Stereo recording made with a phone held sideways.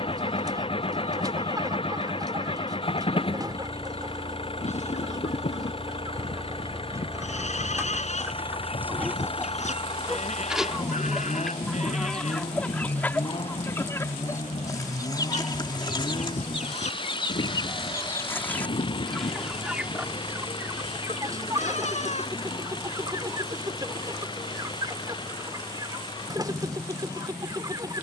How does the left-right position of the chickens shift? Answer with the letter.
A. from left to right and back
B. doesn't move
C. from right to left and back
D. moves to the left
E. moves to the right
C.